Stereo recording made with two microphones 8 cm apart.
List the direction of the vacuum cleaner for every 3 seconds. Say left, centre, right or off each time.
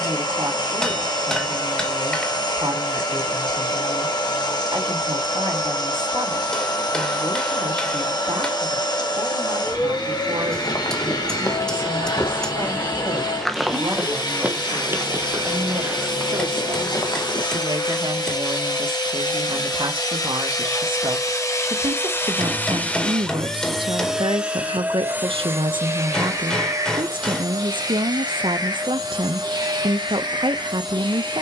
left, left, left, left, left, left, left, left, right, right, right.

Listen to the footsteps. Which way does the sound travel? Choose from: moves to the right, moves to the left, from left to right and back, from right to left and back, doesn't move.
from left to right and back.